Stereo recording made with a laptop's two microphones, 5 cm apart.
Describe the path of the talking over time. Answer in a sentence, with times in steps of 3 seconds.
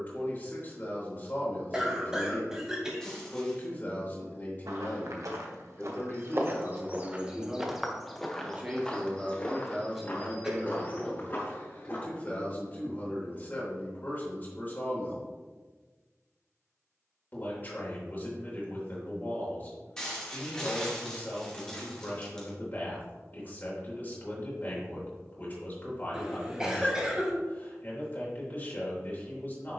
You can hear the talking on the left from 0 s, in the centre from 6 s and on the left from 12 s.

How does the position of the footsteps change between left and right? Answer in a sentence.
In this clip you hear the footsteps move to the left.